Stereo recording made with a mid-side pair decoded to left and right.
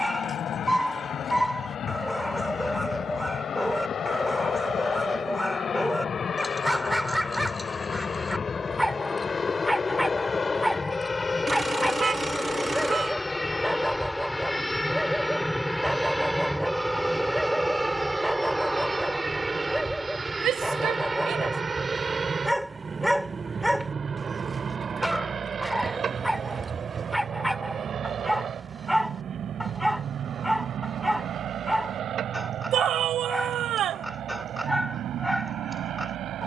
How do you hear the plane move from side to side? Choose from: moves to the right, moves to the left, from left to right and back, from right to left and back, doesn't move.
moves to the right.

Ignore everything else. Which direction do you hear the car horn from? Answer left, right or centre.
right.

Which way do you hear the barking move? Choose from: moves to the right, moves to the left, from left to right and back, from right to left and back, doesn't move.
doesn't move.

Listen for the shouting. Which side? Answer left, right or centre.
right.